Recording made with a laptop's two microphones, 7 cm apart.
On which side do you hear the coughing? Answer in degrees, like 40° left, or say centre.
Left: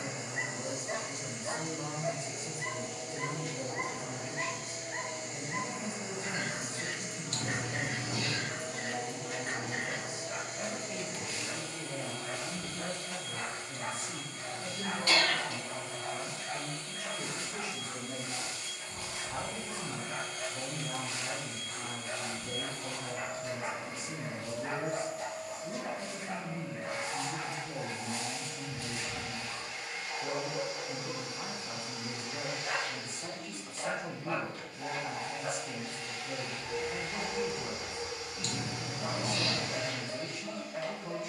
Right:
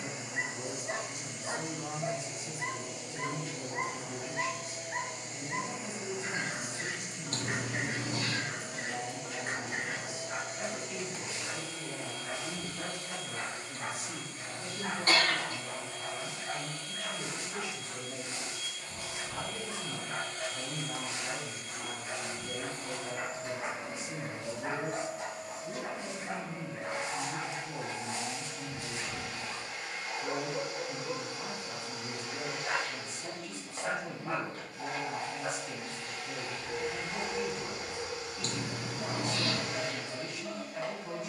40° right.